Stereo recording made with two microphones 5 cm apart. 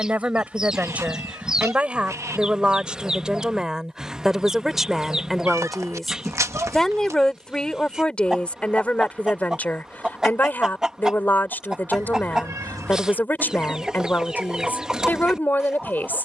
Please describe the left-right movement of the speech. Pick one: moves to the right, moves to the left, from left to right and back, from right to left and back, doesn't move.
moves to the left.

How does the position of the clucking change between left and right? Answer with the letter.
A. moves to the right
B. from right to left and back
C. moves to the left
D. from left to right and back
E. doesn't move
E.